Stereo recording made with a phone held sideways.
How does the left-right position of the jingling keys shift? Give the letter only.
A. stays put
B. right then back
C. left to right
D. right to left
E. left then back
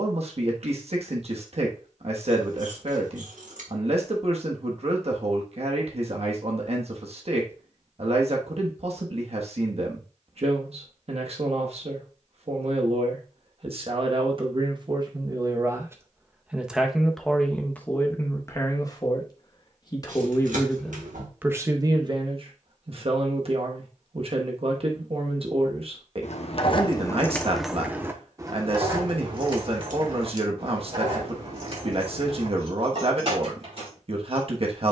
C.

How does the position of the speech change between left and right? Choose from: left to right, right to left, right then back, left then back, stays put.
left then back.